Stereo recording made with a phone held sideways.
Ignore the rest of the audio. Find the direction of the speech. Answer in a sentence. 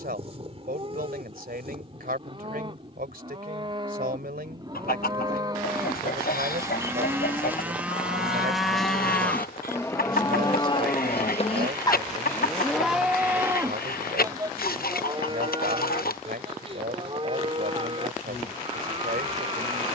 In this clip you hear the speech on the right.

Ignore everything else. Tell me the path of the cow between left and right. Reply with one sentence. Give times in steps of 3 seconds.
In this clip you hear the cow on the right from 0 s, in the centre from 6 s, on the left from 9 s, in the centre from 12 s and on the right from 15 s.